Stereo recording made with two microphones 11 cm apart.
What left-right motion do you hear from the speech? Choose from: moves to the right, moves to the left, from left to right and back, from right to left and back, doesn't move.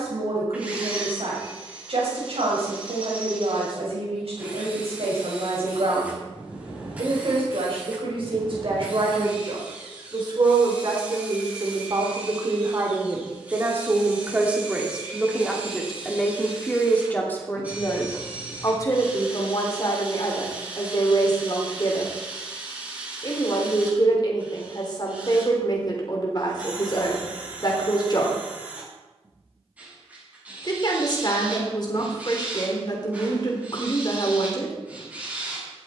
moves to the left.